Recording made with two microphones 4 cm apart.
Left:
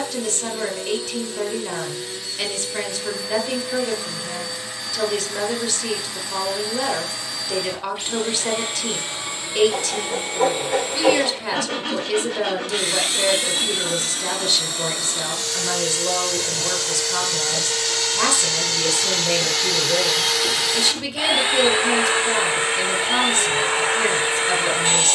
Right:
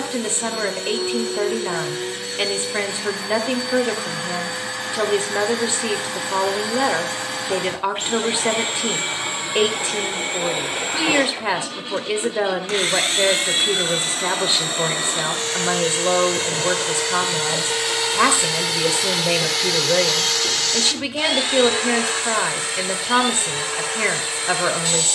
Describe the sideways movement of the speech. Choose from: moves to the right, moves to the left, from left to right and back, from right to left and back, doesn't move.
doesn't move.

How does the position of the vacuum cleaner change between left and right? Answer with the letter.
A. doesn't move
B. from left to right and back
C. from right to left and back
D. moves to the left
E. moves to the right
D.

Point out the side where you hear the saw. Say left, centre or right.
left.